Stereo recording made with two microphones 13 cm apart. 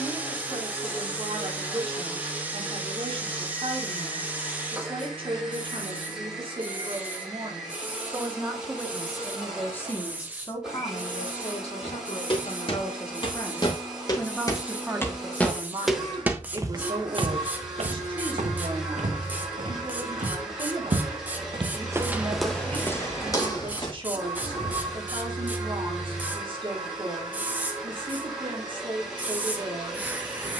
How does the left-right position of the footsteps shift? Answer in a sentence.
In this clip you hear the footsteps move from left to right and back again.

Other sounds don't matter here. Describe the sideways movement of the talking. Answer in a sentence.
You can hear the talking go left and come back.